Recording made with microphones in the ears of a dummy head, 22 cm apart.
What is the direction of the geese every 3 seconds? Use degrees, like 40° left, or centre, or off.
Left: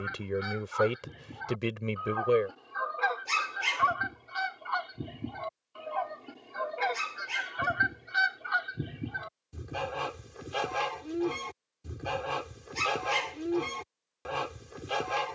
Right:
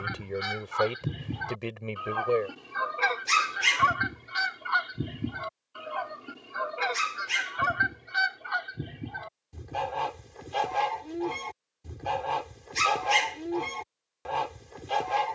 50° right, 30° right, centre, 10° left, 10° left.